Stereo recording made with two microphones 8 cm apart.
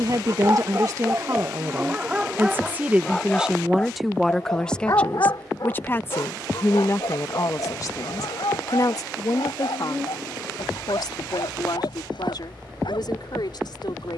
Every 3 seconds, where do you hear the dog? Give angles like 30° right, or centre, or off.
20° right, 40° left, 70° left, 80° left, 80° left.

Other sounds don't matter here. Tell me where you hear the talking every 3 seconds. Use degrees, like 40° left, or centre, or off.
40° right, 10° left, 40° left, 60° left, 70° left.